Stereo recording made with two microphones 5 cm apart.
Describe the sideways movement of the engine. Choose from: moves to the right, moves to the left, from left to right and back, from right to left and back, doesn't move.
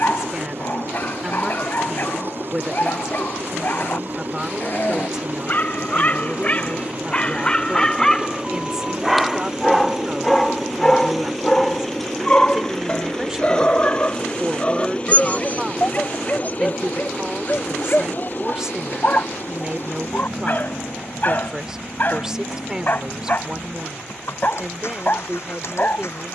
moves to the left.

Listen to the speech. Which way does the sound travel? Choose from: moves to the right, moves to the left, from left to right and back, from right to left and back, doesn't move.
doesn't move.